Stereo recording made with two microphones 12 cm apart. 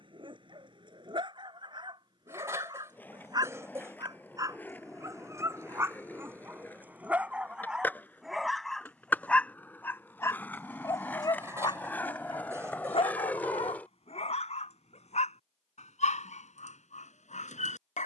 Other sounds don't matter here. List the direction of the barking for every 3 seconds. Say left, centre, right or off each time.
right, right, centre, left, left, left.